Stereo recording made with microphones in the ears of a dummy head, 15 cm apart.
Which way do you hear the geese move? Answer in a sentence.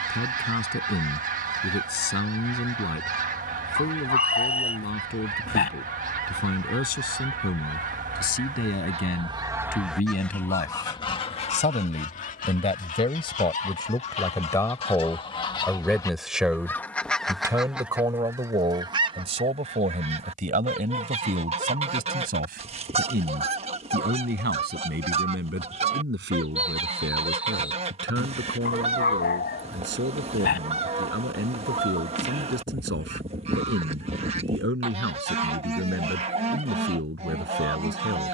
You can hear the geese go left and come back.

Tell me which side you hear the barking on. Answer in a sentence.
In this clip you hear the barking on the left.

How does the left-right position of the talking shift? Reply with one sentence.
In this clip you hear the talking go from the left side to the right.